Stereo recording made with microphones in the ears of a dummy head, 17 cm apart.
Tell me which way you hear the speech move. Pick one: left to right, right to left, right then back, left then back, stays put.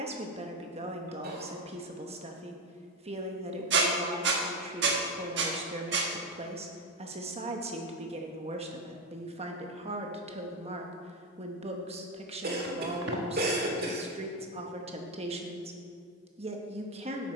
stays put.